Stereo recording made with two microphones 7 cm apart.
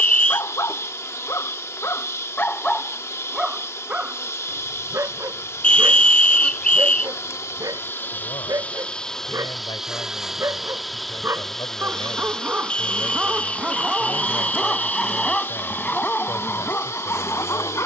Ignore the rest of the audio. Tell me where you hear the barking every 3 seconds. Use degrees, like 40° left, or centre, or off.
40° left, 30° right, 50° right, 40° right, 10° right, 20° left.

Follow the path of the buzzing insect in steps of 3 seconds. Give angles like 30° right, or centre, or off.
40° left, 40° left, 30° left, centre, 20° left, 40° left.